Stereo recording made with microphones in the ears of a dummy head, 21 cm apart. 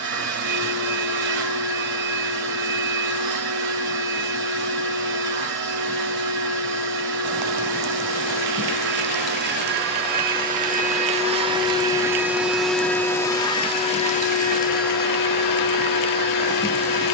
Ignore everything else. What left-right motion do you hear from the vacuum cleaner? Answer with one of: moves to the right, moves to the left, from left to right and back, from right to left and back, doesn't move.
moves to the left.